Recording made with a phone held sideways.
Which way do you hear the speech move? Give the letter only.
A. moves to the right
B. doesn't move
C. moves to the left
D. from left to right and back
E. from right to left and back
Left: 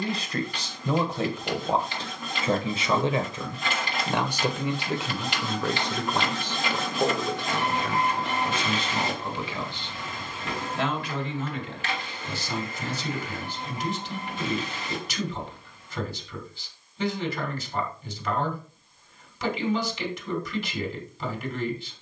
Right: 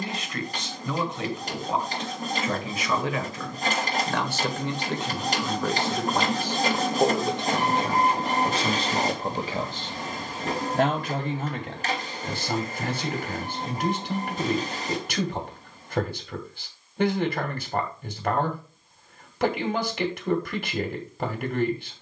A.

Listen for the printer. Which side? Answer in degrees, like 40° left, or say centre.
40° right.